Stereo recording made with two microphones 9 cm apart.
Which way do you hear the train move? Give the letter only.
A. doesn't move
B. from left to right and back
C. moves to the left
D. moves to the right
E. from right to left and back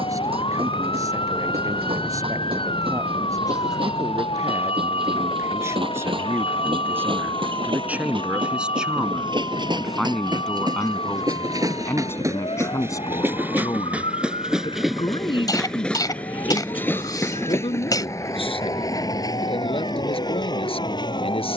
C.